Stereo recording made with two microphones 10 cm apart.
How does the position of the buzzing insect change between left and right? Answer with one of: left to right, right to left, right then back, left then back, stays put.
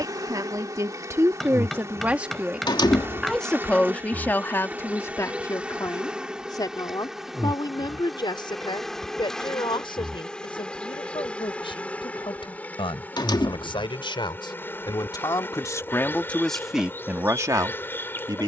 right to left.